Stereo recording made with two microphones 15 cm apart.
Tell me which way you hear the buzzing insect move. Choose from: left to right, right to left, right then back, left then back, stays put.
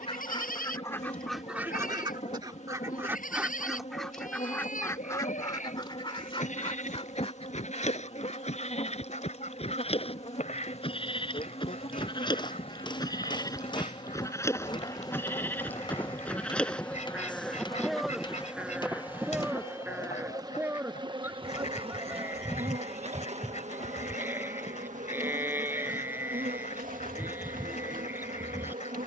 left to right.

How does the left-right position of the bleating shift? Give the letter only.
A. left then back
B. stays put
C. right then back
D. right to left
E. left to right
E.